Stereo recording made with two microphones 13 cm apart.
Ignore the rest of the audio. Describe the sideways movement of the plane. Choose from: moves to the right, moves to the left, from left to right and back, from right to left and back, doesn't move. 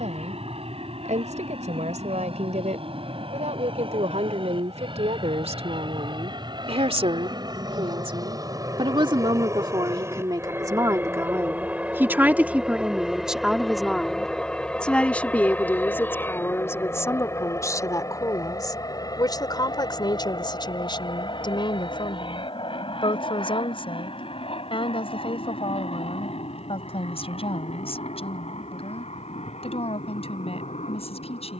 moves to the left.